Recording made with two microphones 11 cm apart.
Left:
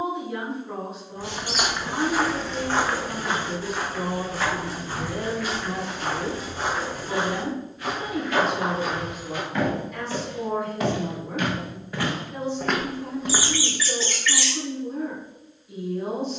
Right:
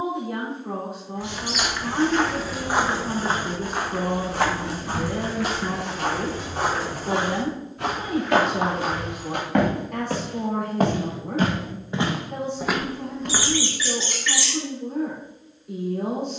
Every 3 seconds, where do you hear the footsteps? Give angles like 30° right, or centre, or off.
10° left, 60° right, 70° right, 50° right, centre, off.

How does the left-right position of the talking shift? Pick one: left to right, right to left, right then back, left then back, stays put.
stays put.